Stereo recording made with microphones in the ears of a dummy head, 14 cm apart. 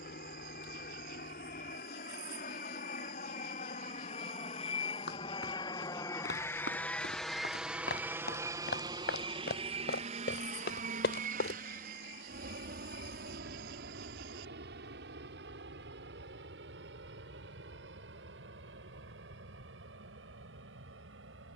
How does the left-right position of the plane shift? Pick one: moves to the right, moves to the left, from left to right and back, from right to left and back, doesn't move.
moves to the right.